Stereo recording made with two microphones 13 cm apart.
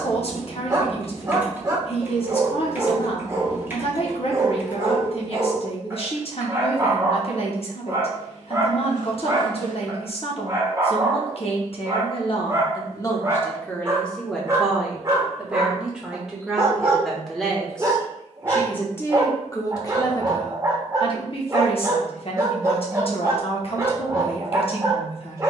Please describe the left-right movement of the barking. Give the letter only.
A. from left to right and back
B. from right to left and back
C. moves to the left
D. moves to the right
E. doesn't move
E.